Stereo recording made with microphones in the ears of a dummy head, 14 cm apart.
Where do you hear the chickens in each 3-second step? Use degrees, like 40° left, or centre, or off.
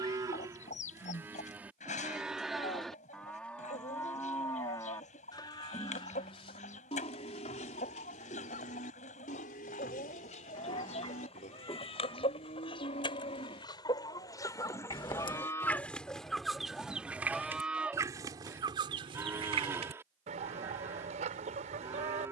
50° left, 50° left, 50° left, 40° left, 30° left, centre, 40° right, 50° right.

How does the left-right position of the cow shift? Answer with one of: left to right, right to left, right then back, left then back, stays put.
left then back.